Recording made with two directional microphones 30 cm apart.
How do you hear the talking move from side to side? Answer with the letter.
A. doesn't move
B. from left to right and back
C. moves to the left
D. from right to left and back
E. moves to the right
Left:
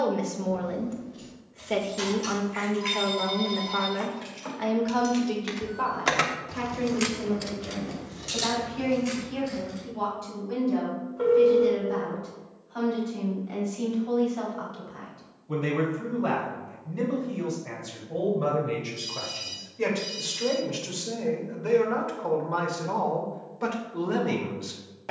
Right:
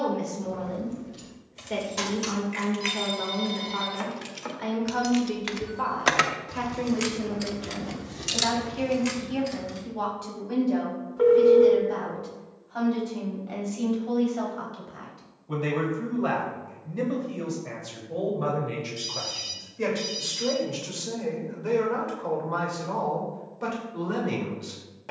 B.